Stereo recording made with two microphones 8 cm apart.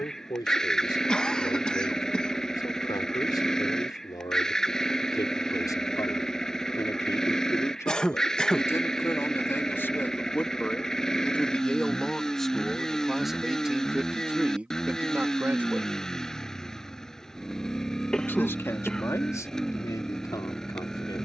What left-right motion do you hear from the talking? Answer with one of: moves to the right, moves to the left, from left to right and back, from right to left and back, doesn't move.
from left to right and back.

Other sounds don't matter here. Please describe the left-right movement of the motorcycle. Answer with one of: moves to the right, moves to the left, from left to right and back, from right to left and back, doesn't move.
doesn't move.